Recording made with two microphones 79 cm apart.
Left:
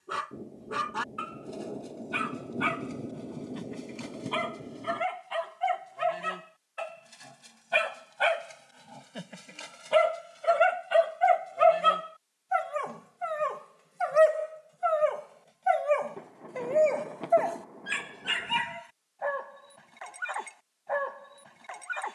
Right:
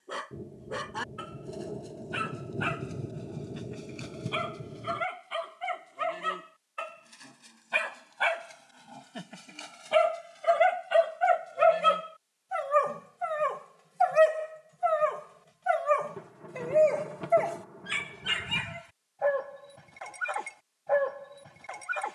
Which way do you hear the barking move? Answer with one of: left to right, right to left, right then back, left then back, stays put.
left to right.